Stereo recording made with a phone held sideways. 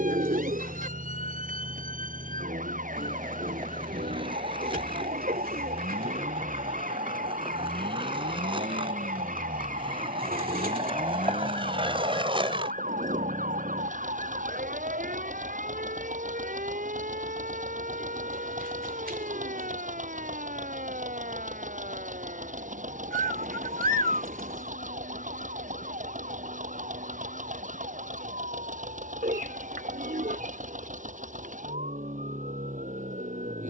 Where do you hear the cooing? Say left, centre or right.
right.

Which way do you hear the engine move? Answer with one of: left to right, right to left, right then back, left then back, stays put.
stays put.